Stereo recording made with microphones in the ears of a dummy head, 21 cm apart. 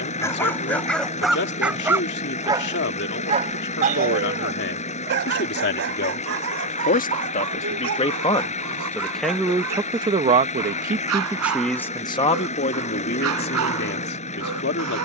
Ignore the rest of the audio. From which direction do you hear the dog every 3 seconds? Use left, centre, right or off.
centre, right, right, right, right.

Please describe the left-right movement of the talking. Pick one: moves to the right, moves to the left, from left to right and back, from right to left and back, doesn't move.
from left to right and back.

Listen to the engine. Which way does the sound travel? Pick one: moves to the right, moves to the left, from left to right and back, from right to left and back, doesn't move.
doesn't move.